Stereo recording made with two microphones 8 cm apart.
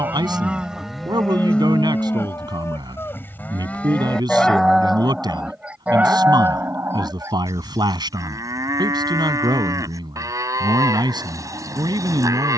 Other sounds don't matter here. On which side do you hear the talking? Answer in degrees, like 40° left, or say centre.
60° right.